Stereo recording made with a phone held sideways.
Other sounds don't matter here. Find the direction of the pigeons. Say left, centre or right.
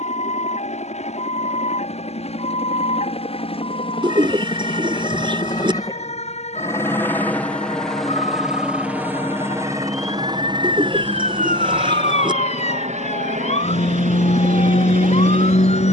right.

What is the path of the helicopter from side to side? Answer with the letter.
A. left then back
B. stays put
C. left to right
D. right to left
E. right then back
C.